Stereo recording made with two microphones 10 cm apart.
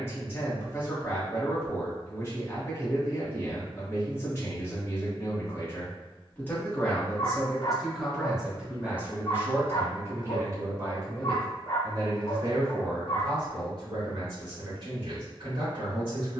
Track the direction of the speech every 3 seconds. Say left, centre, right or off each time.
left, left, centre, right, right, right.